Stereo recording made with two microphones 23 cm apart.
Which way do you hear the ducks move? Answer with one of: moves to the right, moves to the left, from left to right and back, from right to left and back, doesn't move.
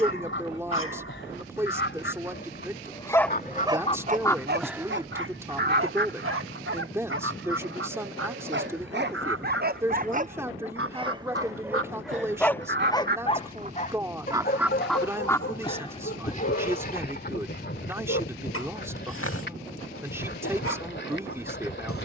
from left to right and back.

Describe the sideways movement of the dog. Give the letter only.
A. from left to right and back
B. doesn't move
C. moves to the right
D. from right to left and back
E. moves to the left
A.